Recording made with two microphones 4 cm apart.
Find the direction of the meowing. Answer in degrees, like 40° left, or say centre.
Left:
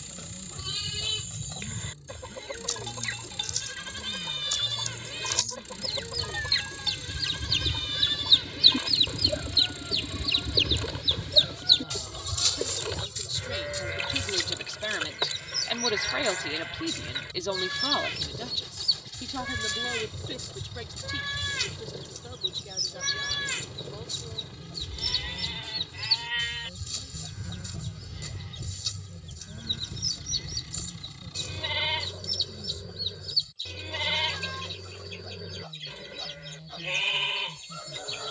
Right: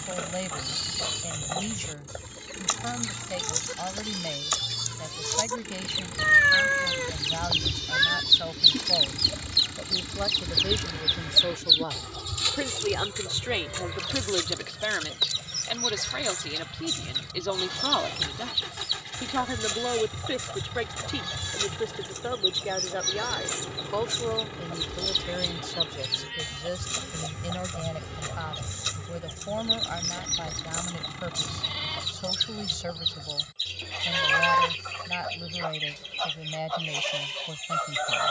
90° right.